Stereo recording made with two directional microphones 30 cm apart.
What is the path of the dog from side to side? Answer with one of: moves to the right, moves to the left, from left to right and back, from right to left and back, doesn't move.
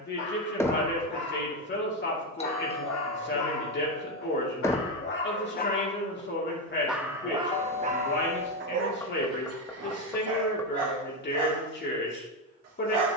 moves to the right.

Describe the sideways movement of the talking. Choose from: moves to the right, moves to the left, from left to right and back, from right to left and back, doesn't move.
doesn't move.